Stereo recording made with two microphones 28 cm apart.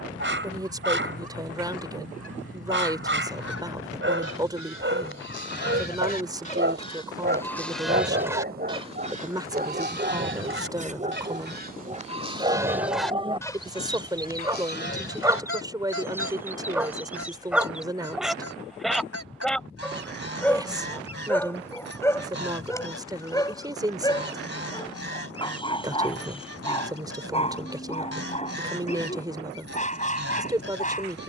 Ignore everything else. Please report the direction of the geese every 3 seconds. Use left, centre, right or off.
left, left, centre, right, centre, left, left, left, left, left, left.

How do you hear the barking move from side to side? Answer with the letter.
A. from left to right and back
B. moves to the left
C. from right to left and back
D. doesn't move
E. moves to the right
B.